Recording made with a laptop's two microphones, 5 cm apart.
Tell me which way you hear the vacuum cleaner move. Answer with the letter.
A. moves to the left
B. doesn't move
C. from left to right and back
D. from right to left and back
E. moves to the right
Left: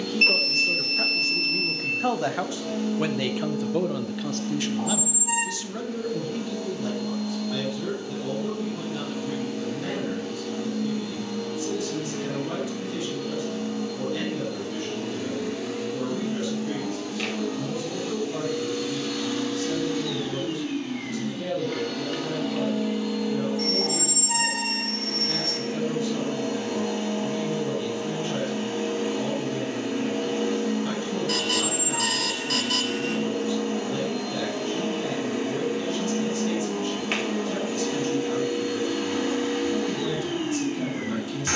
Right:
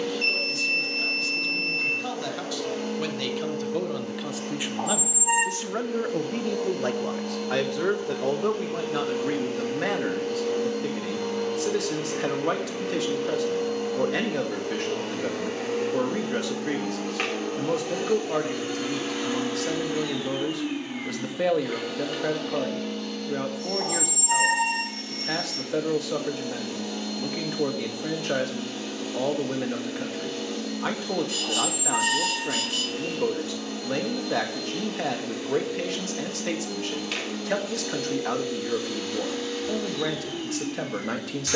A.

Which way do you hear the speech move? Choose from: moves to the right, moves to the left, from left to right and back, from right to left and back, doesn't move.
moves to the right.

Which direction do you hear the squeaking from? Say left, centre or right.
right.